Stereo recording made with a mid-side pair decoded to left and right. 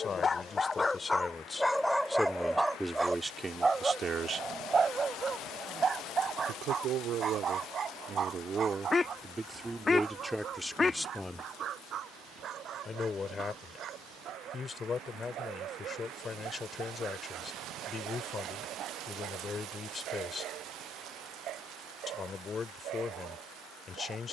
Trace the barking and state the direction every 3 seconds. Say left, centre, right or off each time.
centre, right, right, right, right, right, right, right.